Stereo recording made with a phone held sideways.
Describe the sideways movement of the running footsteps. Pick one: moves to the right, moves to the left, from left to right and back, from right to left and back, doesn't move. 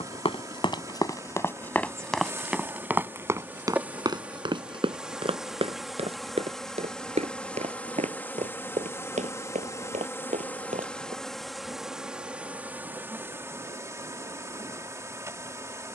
moves to the right.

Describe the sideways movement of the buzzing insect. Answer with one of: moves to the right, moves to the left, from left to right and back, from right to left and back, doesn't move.
from right to left and back.